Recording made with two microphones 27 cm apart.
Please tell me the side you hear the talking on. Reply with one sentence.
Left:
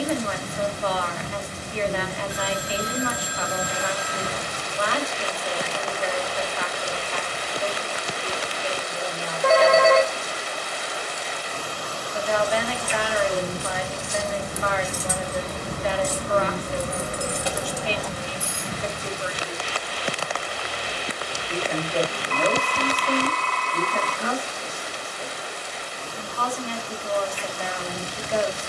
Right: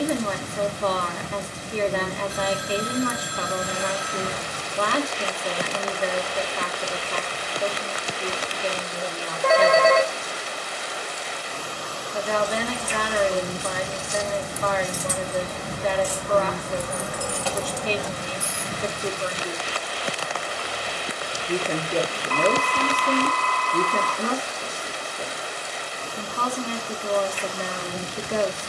In this clip you hear the talking on the right.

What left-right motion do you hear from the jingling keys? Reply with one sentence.
In this clip you hear the jingling keys go from the left side to the right.